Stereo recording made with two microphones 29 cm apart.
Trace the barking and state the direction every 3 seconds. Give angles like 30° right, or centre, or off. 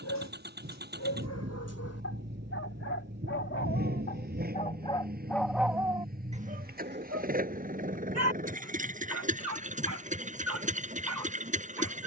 60° left, 20° left, 40° right, 70° right.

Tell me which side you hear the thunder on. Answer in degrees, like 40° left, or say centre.
40° right.